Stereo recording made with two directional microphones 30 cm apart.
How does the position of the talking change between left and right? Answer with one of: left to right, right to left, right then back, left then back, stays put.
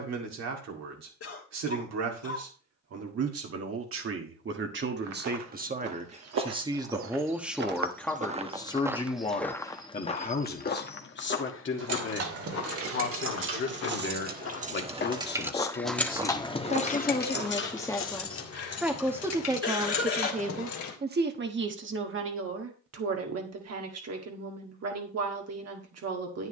left then back.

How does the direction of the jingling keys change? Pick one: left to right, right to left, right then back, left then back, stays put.
right to left.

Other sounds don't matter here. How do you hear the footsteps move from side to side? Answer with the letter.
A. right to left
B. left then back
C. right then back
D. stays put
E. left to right
B.